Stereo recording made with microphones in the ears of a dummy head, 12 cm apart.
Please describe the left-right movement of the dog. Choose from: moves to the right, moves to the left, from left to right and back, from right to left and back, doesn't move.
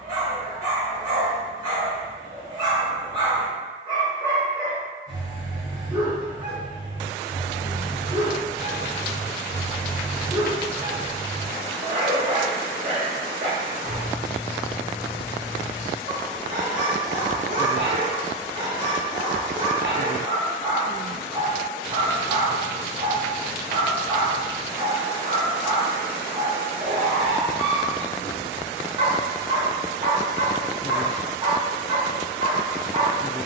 doesn't move.